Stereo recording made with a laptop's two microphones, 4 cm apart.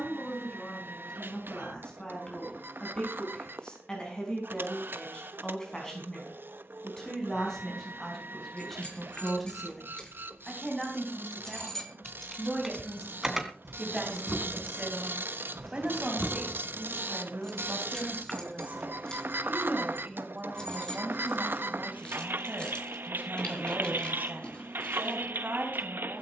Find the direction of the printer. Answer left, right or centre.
right.